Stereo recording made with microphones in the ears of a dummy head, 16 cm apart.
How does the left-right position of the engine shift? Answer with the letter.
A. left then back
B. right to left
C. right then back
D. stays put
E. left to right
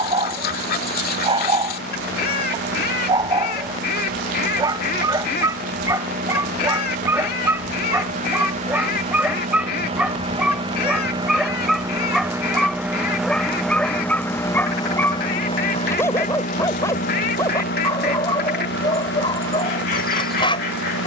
B.